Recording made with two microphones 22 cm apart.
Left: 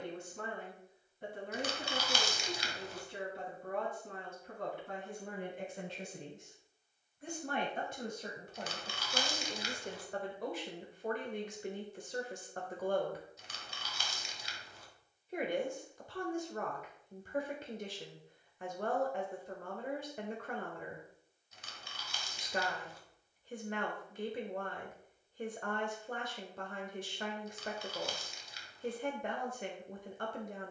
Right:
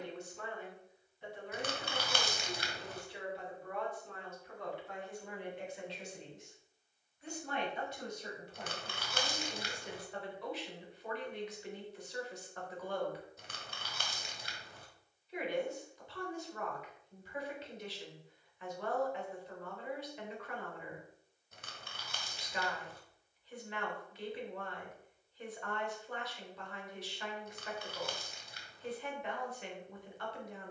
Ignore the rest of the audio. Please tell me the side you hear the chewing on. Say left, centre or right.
right.